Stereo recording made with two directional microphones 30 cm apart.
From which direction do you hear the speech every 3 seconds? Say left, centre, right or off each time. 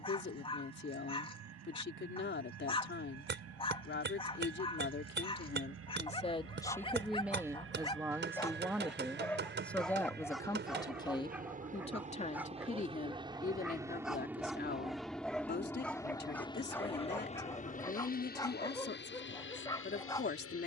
left, left, centre, centre, left, left, left.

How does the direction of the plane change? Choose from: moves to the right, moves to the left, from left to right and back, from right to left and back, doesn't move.
moves to the left.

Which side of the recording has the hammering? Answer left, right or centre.
right.